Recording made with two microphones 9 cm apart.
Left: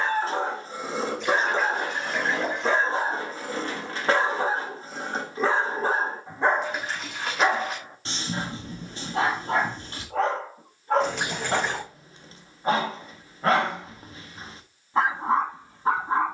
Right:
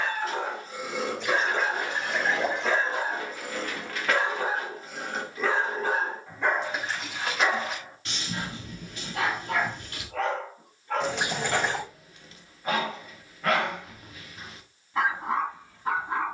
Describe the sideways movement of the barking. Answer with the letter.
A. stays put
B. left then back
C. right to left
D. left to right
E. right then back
A.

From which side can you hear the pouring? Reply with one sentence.
In this clip you hear the pouring in the centre.